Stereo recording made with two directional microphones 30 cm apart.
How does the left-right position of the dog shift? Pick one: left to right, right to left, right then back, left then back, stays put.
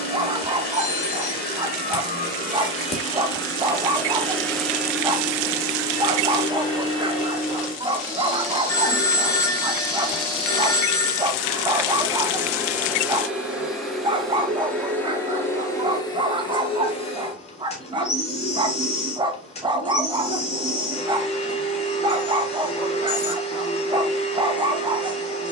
stays put.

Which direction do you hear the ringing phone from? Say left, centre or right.
centre.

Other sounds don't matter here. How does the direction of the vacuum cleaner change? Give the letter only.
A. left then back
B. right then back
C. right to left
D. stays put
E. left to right
B.